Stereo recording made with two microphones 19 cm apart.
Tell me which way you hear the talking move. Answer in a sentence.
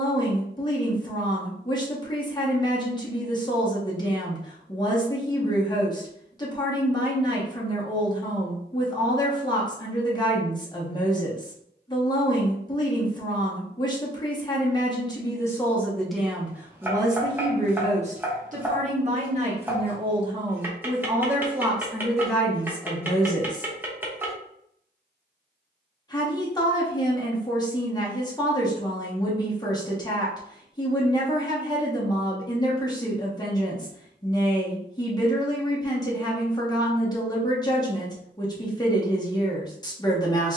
In this clip you hear the talking move from left to right and back again.